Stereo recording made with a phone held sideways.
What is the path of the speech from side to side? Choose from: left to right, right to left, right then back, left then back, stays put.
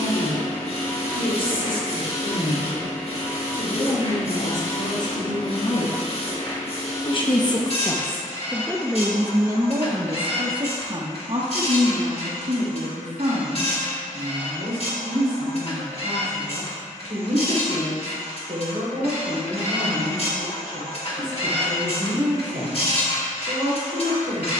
left to right.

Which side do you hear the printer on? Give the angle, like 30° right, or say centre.
50° left.